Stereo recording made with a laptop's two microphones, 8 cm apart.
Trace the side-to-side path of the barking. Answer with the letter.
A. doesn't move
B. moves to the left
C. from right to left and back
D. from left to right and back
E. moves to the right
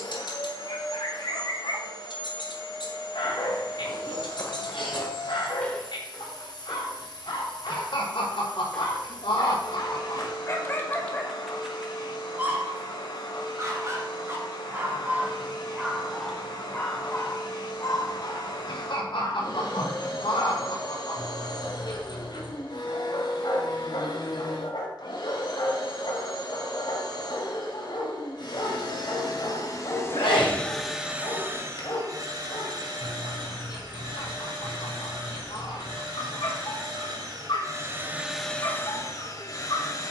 D.